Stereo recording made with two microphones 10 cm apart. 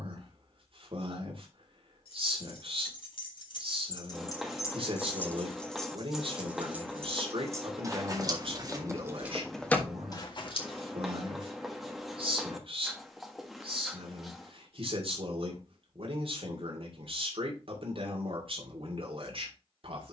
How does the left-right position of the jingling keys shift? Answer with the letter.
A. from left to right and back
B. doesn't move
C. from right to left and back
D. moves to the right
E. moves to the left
A.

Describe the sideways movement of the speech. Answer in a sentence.
You can hear the speech stay put.